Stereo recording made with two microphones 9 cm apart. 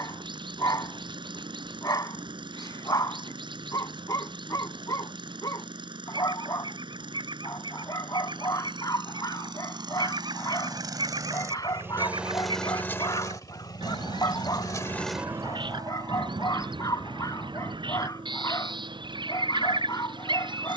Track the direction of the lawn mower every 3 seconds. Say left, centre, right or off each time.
right, right, right, right, left, right, right.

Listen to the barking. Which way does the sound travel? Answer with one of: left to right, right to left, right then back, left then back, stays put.
stays put.